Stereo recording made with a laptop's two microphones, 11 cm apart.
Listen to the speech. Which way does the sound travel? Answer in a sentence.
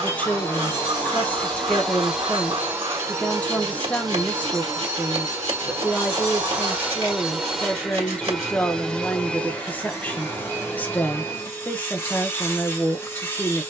In this clip you hear the speech stay in one place.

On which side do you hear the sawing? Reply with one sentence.
You can hear the sawing on the right.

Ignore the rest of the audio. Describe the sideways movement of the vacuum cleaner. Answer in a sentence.
You can hear the vacuum cleaner move from left to right and back again.